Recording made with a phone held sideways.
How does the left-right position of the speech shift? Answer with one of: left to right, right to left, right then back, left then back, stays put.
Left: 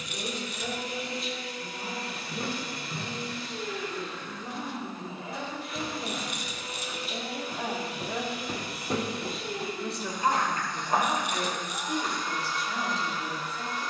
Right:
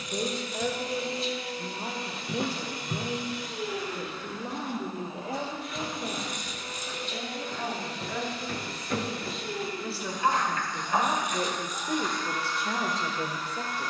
left then back.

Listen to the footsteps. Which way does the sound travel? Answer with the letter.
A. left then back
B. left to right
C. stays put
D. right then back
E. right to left
E.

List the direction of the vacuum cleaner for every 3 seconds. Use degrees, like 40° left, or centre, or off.
30° right, 10° right, 10° left, 20° left, 20° left.